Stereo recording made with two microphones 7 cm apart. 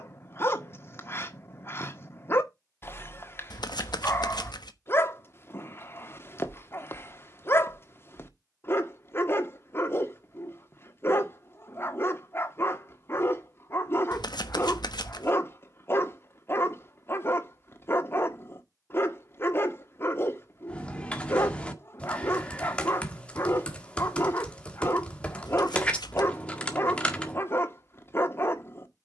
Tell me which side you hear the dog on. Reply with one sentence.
In this clip you hear the dog on the left.